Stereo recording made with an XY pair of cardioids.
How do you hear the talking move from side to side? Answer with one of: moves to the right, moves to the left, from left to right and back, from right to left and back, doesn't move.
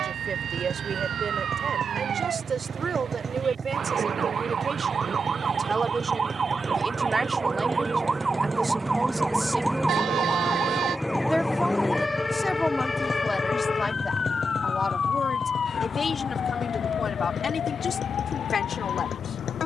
moves to the left.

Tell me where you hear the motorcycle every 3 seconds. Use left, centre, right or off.
right, right, right, centre, left, left, left.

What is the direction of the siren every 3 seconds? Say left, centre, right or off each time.
right, right, right, centre, left, left, left.